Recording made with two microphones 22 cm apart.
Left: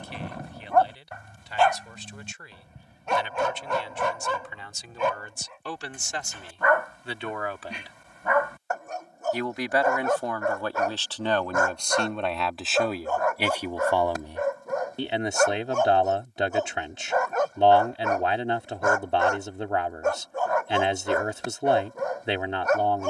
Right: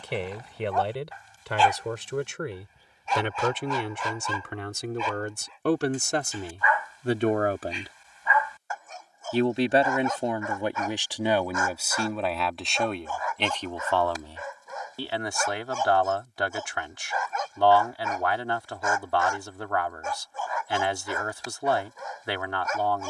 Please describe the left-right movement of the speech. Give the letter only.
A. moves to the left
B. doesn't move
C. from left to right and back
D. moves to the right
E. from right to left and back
A.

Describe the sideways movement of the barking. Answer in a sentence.
In this clip you hear the barking stay in one place.